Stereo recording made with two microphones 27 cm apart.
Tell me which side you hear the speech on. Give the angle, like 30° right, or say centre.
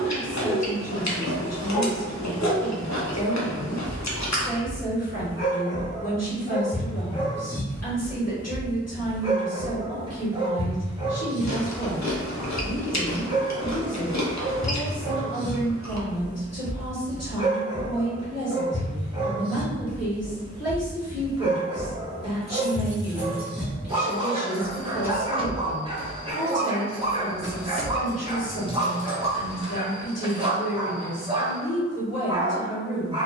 70° left.